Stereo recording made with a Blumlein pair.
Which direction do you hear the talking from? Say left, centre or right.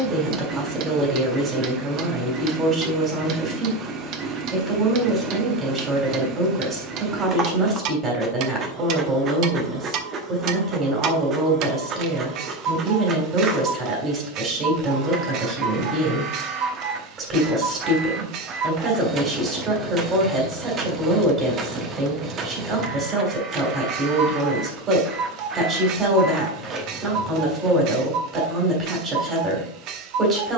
right.